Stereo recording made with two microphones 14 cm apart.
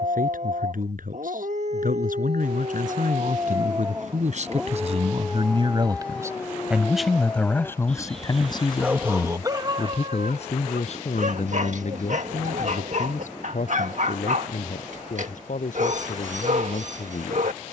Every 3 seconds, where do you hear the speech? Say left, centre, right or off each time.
right, right, centre, left, left, left.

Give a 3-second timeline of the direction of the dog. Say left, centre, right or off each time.
right, centre, centre, right, right, right.